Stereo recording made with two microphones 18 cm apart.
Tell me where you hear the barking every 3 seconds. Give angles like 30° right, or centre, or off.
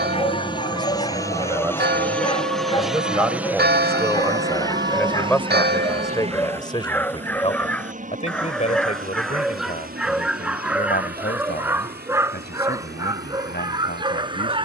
30° left, 20° left, 10° left, 10° right, 20° right.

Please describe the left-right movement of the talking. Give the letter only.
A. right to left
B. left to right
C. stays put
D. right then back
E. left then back
A.